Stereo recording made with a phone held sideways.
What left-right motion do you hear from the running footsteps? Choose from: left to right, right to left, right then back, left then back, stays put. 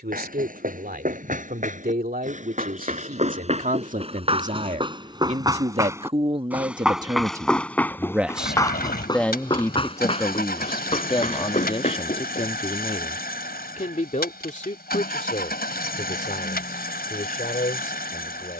right to left.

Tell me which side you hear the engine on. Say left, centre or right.
left.